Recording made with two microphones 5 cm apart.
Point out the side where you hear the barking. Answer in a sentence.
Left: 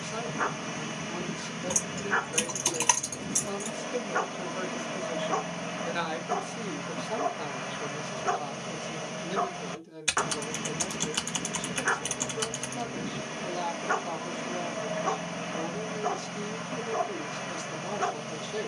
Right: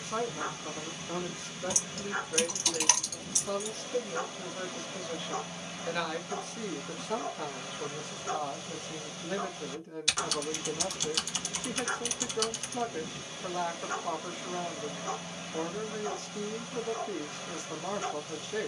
In this clip you hear the barking on the left.